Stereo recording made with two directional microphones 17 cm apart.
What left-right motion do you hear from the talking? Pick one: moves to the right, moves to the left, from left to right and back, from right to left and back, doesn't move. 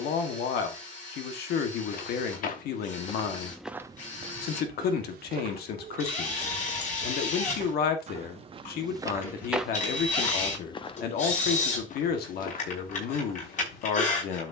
doesn't move.